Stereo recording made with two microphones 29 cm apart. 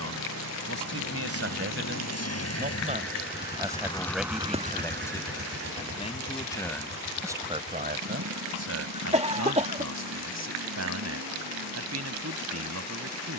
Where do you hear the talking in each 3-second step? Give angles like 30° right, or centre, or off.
50° right, centre, 20° right, 70° right, 70° right.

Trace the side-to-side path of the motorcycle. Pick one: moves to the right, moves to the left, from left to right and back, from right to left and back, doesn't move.
moves to the right.